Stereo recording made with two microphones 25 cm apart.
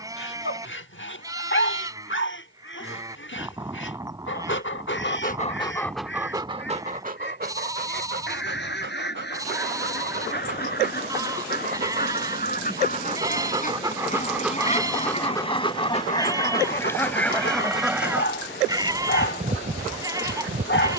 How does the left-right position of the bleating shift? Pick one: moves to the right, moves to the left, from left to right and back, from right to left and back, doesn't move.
doesn't move.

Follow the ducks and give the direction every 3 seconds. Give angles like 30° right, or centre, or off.
50° left, 50° left, 50° left, 40° left, 30° left, 10° left, 30° right.